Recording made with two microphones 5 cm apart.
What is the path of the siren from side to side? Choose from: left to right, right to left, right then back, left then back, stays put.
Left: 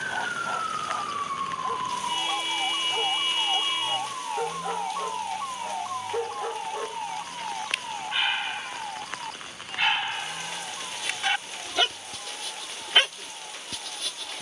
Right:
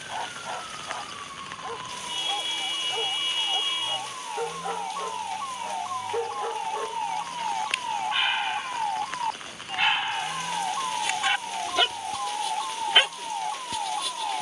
left to right.